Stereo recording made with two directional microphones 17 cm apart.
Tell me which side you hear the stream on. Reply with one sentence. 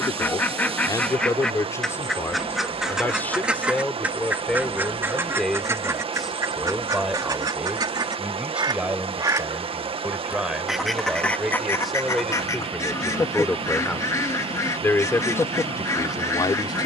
In this clip you hear the stream on the right.